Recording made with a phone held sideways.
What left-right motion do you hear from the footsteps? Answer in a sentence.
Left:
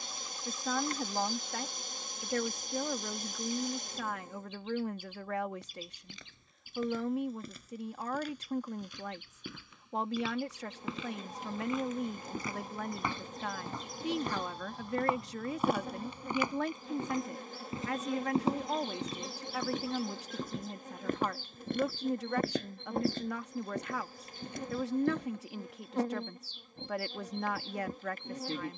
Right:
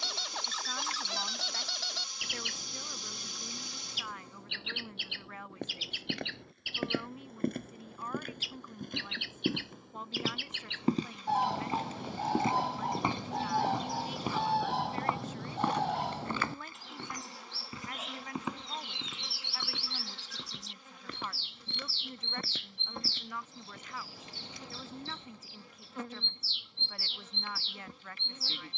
You can hear the footsteps travel towards the left.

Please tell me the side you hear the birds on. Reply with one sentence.
In this clip you hear the birds on the right.